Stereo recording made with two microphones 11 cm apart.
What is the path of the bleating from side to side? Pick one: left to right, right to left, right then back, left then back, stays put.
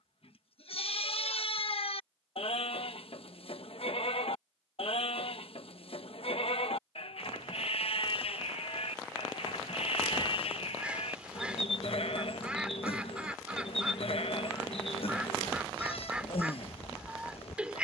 stays put.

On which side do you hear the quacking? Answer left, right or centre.
centre.